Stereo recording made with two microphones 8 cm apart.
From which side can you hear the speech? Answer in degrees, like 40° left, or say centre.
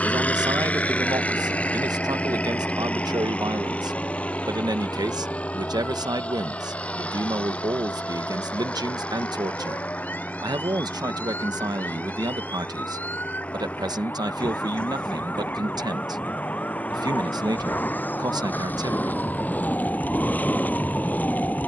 50° right.